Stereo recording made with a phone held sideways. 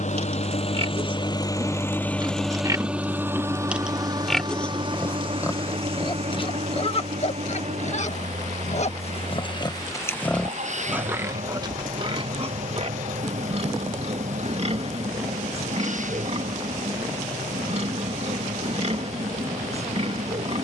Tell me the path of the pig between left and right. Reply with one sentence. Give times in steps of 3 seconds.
In this clip you hear the pig on the right from 0 s, in the centre from 3 s, on the left from 6 s, in the centre from 9 s and on the right from 12 s.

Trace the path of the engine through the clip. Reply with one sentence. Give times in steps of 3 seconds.
In this clip you hear the engine on the left from 0 s and on the right from 3 s.